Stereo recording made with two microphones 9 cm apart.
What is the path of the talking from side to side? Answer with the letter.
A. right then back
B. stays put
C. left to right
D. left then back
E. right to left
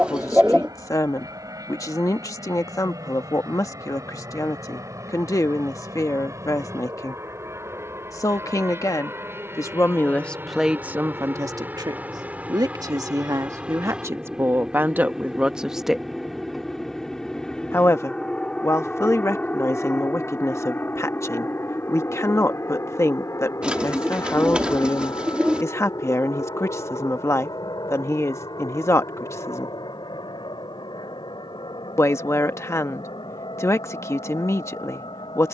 A.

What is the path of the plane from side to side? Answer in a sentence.
You can hear the plane travel towards the left.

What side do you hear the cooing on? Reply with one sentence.
In this clip you hear the cooing in the centre.